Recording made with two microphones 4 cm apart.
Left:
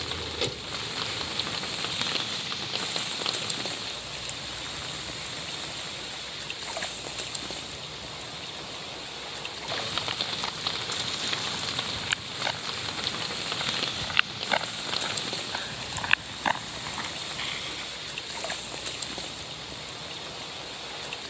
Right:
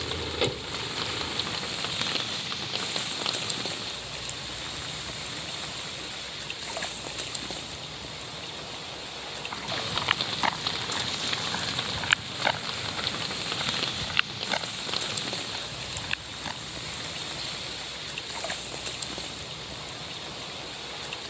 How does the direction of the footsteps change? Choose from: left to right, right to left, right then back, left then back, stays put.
right to left.